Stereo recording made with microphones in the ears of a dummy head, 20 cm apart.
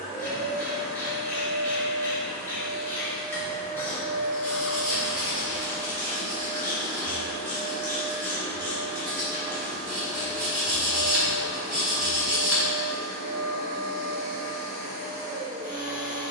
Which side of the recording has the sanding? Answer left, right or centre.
centre.